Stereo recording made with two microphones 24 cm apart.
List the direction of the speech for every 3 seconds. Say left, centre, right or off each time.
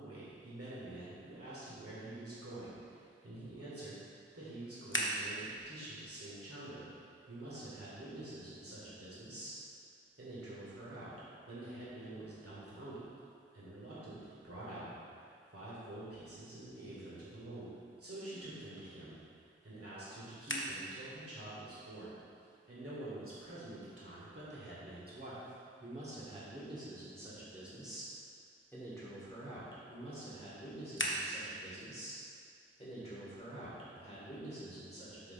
right, right, right, right, right, right, right, right, right, centre, left, left.